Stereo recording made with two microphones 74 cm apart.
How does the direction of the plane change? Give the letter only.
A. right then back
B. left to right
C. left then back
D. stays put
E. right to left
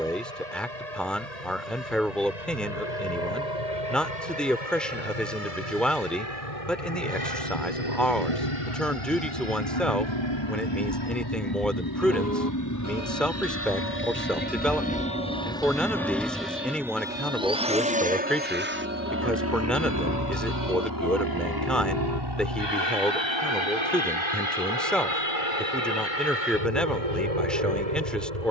B.